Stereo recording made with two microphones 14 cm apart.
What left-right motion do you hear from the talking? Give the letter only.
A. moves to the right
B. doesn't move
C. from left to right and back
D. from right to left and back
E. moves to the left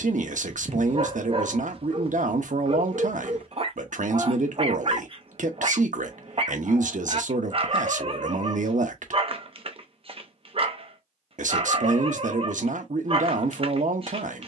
B.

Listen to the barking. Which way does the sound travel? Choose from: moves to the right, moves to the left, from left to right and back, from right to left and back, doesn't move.
doesn't move.